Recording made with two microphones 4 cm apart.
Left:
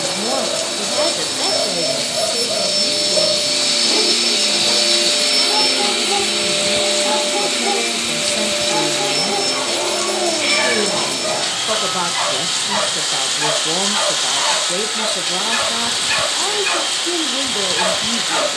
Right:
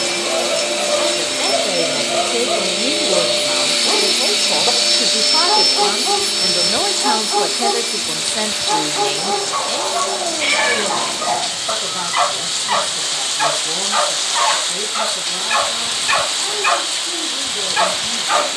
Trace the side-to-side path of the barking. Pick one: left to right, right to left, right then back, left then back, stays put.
stays put.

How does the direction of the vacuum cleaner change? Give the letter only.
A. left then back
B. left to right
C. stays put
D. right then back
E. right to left
E.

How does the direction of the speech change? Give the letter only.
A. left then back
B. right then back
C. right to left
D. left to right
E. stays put
B.